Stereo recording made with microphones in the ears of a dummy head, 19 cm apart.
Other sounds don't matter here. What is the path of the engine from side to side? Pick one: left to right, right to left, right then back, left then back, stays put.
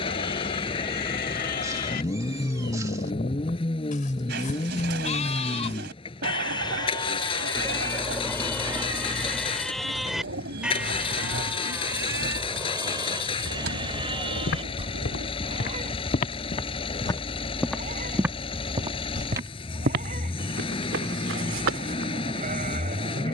stays put.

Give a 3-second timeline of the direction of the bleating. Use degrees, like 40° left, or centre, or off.
50° left, 40° left, 20° left, centre, 20° right, 30° right, 40° right, 40° right.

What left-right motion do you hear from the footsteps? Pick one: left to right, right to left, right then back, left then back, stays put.
left to right.